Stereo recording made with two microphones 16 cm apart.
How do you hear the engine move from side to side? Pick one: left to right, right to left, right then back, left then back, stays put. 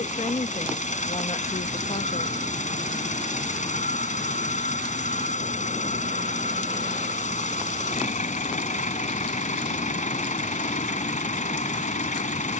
stays put.